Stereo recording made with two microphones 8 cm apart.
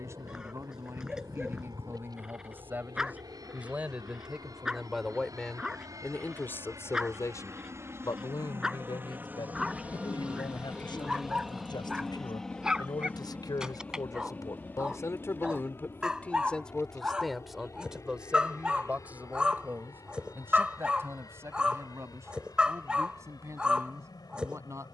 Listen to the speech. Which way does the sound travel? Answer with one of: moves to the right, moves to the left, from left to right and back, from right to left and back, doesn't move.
from right to left and back.